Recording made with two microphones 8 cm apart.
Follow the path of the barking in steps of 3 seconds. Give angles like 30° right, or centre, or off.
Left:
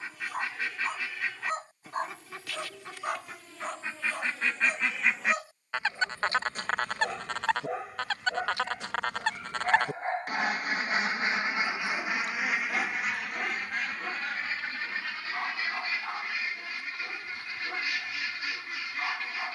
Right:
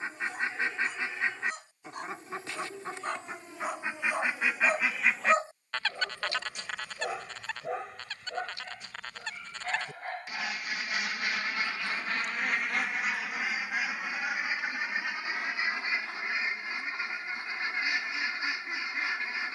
40° left, 20° right, centre, 30° left, 50° left, 50° left, 50° left.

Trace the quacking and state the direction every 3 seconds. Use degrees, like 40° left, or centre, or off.
30° right, 10° right, 60° left, 40° left, centre, 20° right, 20° right.